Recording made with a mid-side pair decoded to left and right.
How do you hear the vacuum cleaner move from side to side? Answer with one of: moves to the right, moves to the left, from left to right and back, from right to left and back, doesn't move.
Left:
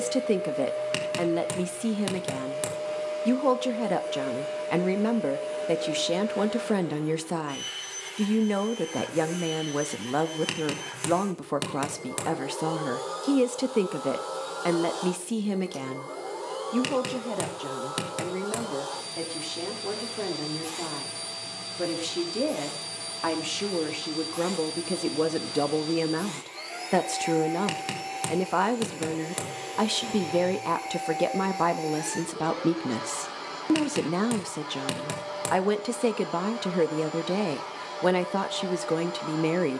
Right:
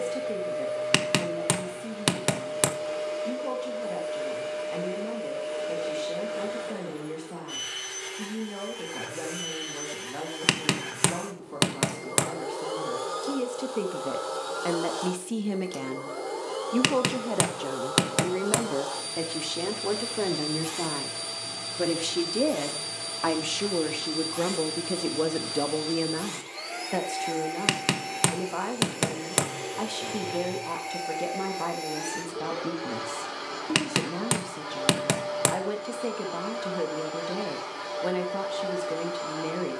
doesn't move.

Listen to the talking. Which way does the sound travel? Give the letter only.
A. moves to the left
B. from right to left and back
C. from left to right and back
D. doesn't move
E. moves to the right
C.